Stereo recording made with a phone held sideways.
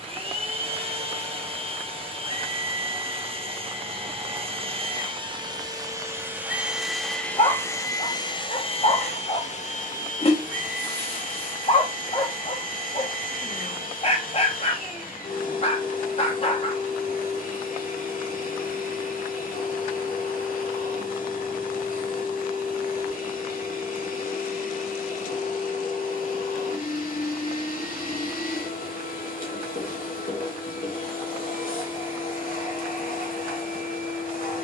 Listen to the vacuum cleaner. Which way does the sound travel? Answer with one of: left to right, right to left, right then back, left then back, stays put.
right to left.